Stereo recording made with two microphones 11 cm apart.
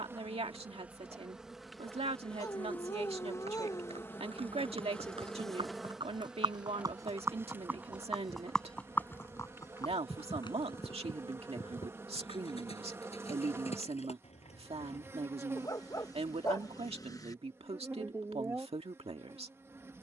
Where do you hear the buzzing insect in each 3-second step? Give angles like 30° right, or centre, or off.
centre, 10° left, 20° right, 20° right, 20° right, 20° right, 20° right.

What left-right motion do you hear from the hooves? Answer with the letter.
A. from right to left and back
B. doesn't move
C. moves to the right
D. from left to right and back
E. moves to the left
E.